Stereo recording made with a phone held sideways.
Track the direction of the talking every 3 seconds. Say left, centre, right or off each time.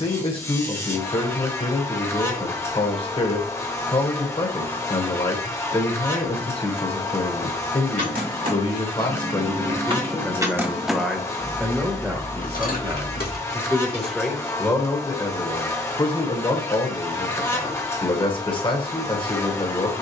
left, left, left, centre, centre, left, left.